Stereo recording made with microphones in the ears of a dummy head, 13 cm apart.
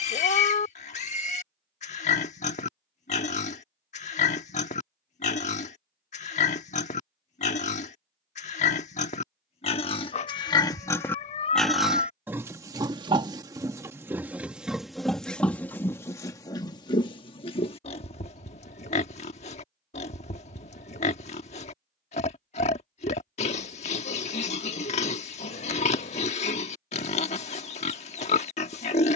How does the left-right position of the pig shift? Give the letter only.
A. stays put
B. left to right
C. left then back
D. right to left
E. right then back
E.